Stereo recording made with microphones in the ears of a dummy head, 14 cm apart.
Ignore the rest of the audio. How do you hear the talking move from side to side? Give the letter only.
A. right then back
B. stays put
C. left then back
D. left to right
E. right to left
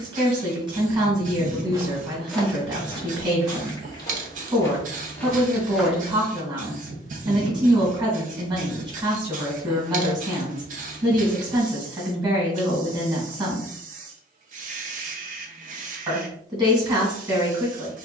B.